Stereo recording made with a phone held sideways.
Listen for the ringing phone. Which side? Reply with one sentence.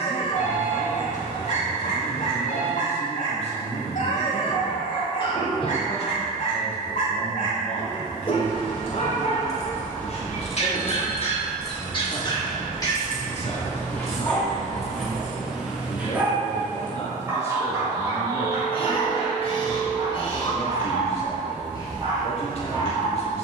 You can hear the ringing phone on the left.